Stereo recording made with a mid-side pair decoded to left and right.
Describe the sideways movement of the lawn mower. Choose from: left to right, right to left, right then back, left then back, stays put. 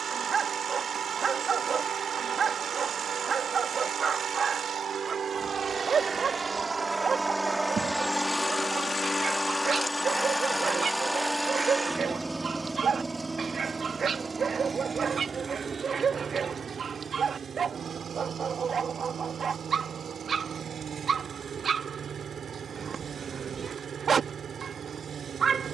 left then back.